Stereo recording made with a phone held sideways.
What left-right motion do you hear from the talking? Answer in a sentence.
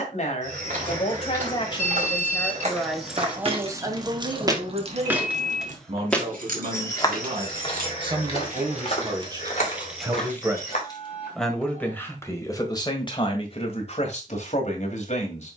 In this clip you hear the talking go right and come back.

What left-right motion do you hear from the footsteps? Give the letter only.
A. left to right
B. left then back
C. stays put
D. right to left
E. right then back
D.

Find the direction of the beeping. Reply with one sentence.
In this clip you hear the beeping on the left.